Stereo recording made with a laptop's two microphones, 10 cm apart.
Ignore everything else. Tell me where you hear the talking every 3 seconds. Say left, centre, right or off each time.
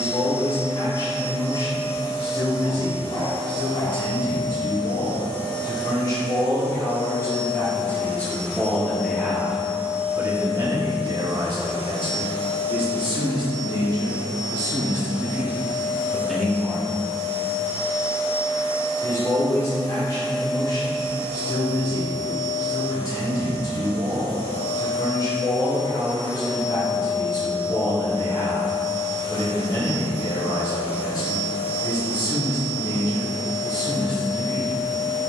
left, left, left, right, right, centre, left, left, left, left, left, left.